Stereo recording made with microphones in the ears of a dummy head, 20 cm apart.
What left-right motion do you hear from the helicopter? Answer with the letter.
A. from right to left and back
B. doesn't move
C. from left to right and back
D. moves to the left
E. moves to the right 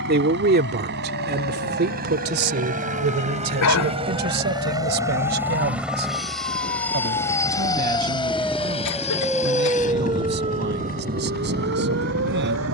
D.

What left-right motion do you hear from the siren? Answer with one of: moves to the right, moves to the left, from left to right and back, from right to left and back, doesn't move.
moves to the right.